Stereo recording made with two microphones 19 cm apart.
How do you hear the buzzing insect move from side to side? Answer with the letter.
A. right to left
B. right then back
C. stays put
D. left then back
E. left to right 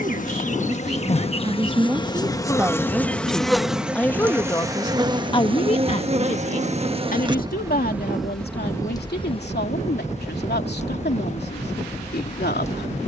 B.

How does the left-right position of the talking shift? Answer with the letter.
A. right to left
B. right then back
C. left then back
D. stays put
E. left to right
A.